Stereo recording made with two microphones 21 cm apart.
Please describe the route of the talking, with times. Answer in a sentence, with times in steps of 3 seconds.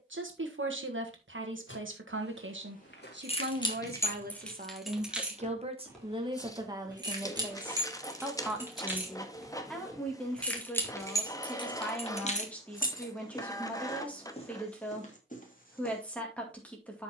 In this clip you hear the talking on the right from 0 s and in the centre from 6 s.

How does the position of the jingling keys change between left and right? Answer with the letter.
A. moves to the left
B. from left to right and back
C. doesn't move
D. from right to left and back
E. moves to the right
B.